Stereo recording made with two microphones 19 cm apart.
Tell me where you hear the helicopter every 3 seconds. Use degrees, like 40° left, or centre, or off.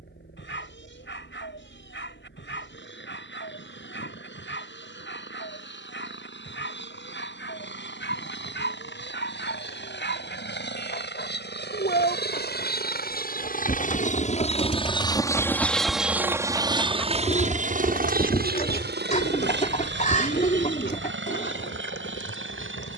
80° left, 80° left, 80° left, 70° left, 50° left, 10° right, 60° right, 70° right.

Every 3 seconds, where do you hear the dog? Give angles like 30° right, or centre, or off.
70° left, 70° left, 70° left, 60° left, 50° left, centre, 60° left, 70° left.